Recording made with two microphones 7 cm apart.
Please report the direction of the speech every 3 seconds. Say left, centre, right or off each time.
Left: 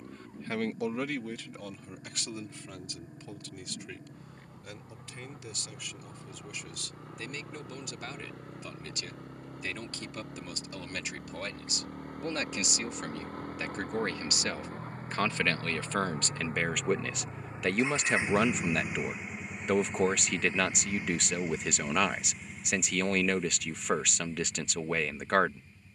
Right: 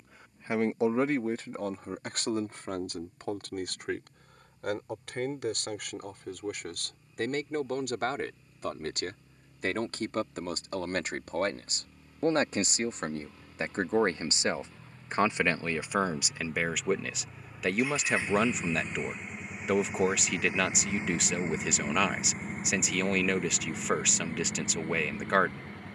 right, right, right, right, right, centre, centre, centre, centre.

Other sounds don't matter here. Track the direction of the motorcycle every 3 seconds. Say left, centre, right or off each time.
left, left, left, left, left, left, centre, right, right.